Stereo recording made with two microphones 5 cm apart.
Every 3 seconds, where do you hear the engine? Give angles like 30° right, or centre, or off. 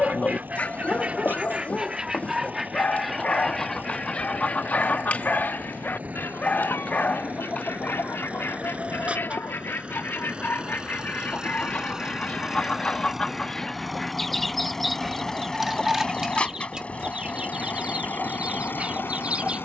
50° right, 40° right, 40° right, 30° right, 10° right, 20° left, 50° left.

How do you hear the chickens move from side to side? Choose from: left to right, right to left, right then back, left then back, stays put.
left then back.